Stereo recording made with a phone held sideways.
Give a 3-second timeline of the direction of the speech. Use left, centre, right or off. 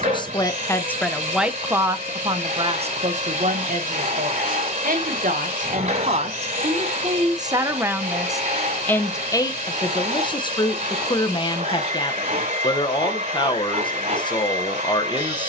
centre, right, right, left, left.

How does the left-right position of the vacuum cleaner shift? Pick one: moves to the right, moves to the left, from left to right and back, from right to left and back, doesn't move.
doesn't move.